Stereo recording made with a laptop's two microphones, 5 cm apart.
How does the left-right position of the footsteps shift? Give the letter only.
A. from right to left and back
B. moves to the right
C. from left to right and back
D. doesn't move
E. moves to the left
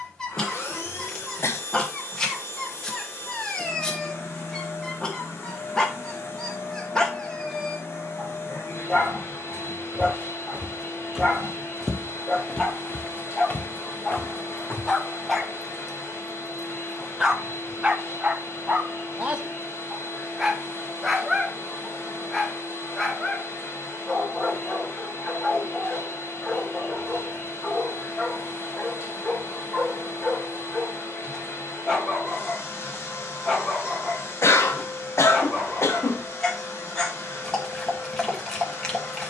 E.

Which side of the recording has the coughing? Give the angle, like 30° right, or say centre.
70° left.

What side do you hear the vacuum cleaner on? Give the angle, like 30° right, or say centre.
70° left.